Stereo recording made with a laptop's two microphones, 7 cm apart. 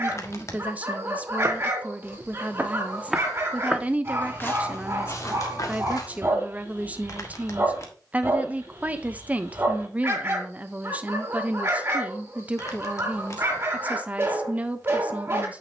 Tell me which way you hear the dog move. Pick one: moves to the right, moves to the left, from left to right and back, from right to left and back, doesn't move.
doesn't move.